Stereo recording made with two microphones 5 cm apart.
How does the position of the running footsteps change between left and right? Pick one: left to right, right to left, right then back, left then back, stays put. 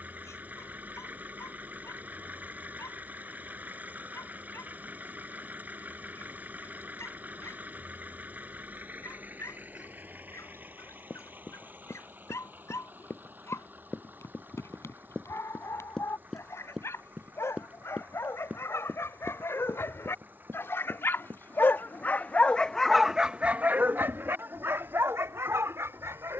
left to right.